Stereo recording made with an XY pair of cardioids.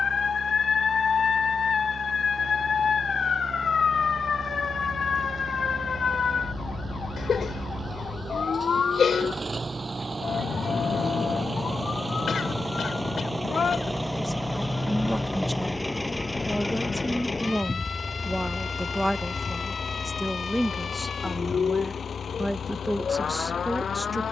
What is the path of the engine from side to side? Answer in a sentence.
You can hear the engine move from right to left.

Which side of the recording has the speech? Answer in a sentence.
You can hear the speech in the centre.